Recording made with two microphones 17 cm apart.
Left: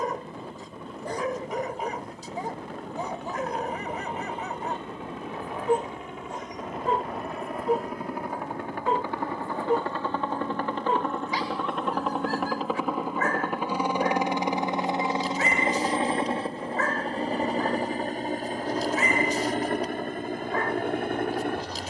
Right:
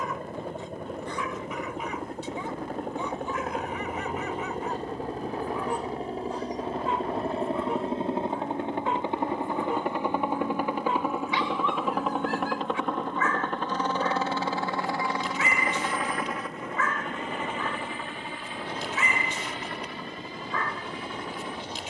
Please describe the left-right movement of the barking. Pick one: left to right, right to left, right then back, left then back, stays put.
stays put.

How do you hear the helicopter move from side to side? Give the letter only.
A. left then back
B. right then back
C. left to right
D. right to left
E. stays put
D.